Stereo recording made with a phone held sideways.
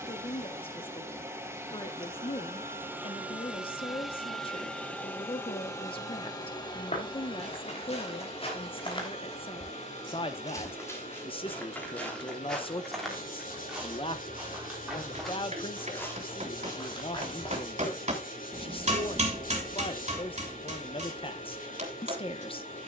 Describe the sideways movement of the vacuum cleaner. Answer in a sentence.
In this clip you hear the vacuum cleaner move to the left.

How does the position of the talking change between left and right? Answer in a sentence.
In this clip you hear the talking stay put.